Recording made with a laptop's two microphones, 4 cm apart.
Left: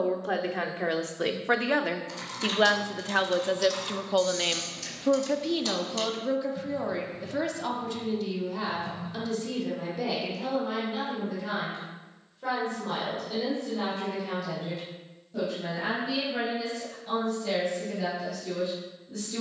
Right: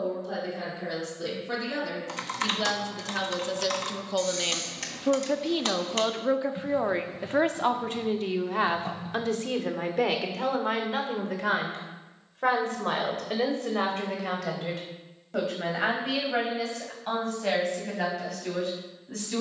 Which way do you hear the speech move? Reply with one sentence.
In this clip you hear the speech go from the left side to the right.